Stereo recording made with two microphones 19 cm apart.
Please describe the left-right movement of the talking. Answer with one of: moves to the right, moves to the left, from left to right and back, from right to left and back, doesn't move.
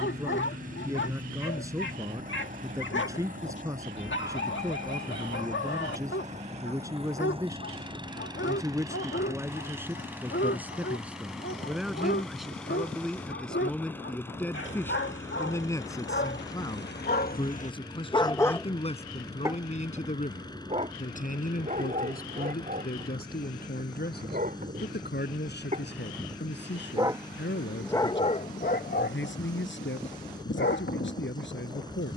moves to the left.